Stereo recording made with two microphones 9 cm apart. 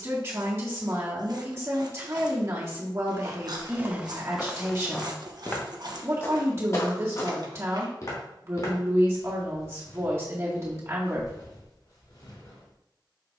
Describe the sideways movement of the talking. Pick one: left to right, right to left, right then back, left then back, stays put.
stays put.